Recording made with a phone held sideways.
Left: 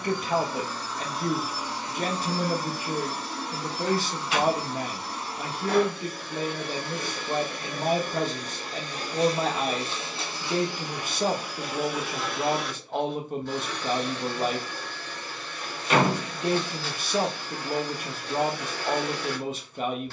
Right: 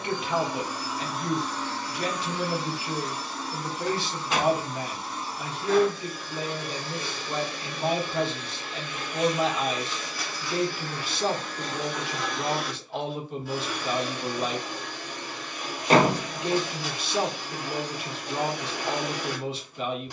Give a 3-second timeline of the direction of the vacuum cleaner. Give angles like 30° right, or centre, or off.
10° left, 60° left, 50° left, 20° left, 10° right, 20° right, 20° right.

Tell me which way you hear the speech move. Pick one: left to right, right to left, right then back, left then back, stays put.
stays put.